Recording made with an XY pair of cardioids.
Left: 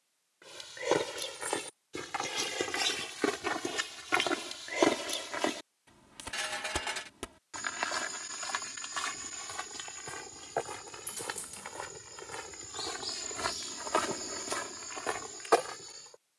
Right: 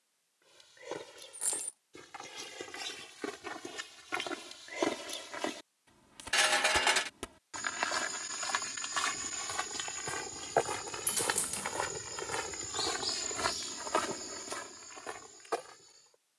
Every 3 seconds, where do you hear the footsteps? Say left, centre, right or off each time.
left, left, centre, right, centre, left.